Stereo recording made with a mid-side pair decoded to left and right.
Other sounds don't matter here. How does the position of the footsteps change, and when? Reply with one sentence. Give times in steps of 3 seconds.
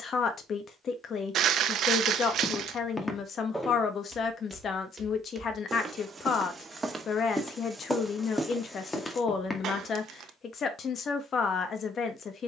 You can hear the footsteps on the left from 0 s, in the centre from 3 s and on the left from 9 s.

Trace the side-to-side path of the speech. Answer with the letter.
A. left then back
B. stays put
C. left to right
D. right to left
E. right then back
B.